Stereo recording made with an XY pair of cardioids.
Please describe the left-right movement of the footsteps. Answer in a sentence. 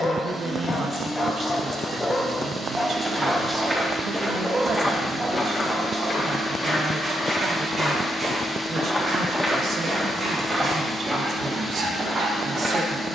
You can hear the footsteps move from right to left and back again.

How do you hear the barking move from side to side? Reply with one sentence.
You can hear the barking go from the left side to the right.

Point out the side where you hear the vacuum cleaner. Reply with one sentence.
In this clip you hear the vacuum cleaner on the right.